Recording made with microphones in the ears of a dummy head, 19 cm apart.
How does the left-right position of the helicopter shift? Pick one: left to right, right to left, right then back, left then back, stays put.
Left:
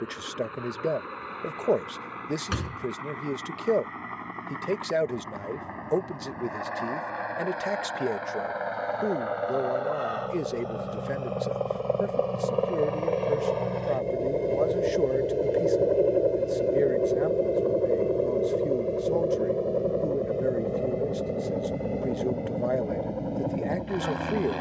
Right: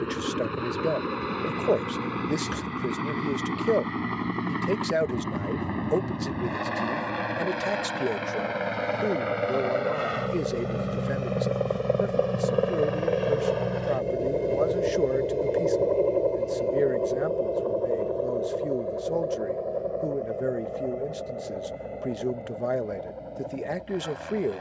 right to left.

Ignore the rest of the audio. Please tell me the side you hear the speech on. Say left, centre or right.
centre.